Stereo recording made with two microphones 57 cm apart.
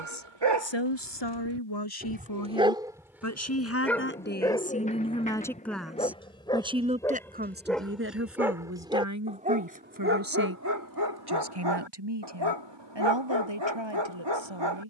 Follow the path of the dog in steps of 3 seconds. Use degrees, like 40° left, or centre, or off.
30° right, centre, centre, 30° right, 50° right.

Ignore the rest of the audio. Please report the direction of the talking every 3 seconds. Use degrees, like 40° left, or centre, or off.
40° left, 10° left, 20° right, 40° right, 50° right.